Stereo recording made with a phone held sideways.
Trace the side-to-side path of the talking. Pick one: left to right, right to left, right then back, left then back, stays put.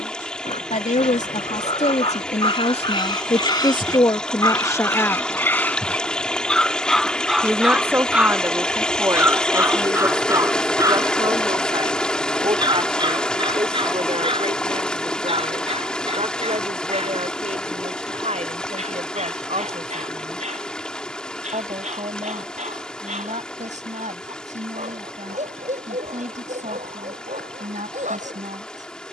left to right.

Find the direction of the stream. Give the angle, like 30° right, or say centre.
10° left.